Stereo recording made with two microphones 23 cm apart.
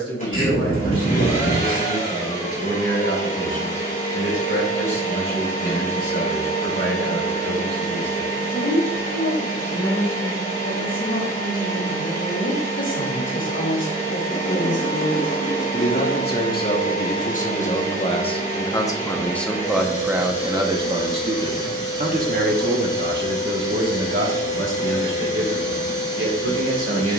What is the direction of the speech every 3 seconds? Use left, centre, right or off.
left, left, left, left, left, left, centre, right, right.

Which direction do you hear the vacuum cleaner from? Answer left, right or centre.
left.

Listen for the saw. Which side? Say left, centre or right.
left.